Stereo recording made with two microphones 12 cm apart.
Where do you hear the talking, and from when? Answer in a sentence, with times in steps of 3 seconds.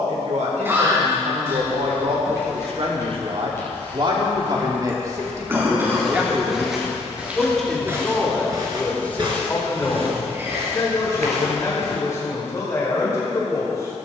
You can hear the talking on the right from 0 s, in the centre from 6 s and on the left from 9 s.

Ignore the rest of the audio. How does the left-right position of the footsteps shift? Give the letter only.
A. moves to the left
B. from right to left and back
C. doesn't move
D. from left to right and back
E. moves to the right
E.